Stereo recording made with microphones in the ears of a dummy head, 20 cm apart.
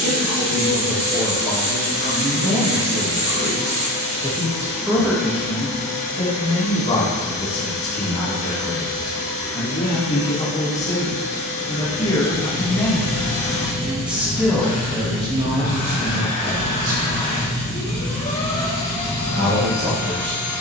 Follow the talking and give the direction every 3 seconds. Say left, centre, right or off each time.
right, centre, left, left, centre, right, right.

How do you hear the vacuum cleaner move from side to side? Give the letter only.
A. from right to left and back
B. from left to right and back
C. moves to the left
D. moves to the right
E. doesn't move
E.